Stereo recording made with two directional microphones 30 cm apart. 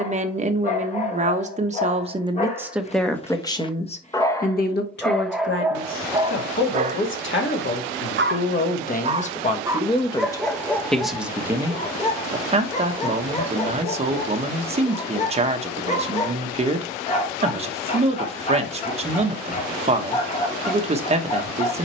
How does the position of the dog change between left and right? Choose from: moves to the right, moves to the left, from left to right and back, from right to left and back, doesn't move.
from left to right and back.